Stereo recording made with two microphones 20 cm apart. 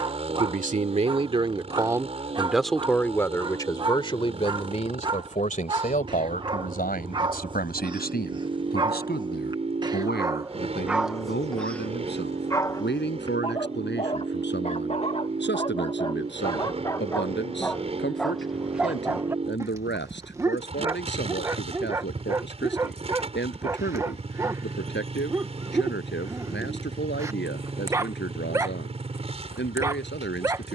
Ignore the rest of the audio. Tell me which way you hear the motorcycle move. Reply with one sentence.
In this clip you hear the motorcycle stay in one place.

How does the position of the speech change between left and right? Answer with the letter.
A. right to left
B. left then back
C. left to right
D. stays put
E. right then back
A.